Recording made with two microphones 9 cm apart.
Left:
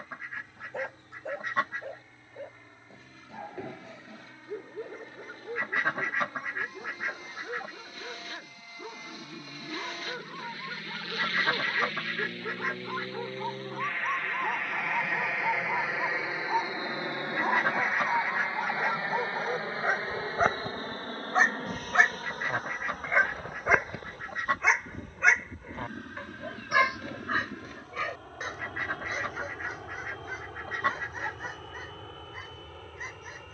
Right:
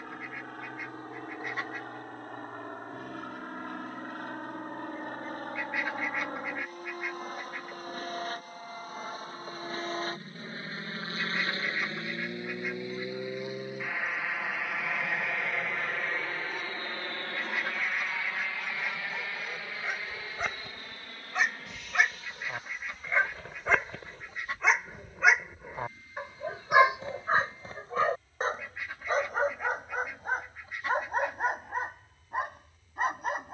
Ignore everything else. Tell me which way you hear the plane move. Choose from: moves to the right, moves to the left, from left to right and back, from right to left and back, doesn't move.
moves to the left.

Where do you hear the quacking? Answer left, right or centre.
left.